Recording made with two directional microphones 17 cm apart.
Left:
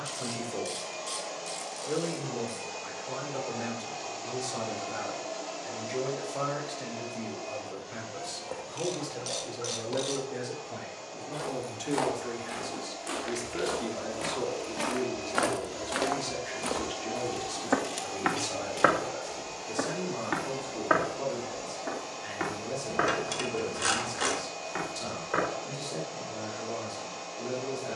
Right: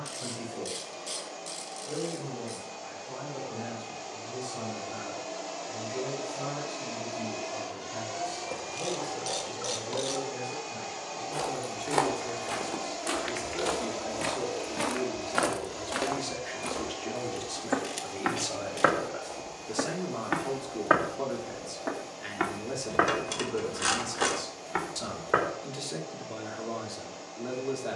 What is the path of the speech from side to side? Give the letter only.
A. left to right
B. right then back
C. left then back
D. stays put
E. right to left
A.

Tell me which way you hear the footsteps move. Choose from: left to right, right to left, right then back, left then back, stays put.
left then back.